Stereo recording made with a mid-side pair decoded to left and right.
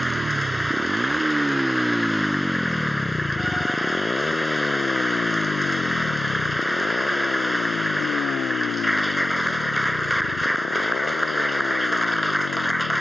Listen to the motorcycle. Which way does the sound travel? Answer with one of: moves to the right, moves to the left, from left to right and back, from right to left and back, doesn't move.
moves to the left.